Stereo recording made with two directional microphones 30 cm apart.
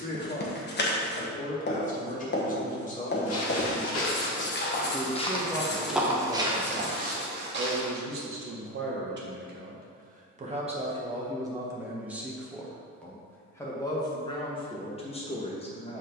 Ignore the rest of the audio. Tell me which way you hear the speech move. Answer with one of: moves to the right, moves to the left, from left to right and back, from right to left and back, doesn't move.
from left to right and back.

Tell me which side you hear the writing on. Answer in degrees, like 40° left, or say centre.
40° left.